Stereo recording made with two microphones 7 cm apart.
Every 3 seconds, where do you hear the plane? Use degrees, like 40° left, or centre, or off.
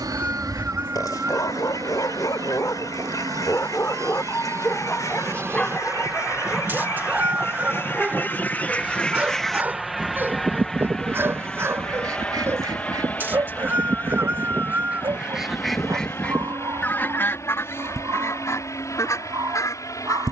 60° right, 40° right, 20° right, centre, 20° left, 40° left, 40° left.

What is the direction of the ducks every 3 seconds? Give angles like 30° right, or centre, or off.
60° left, 50° left, 40° left, 20° right, 50° right, 20° left, 50° left.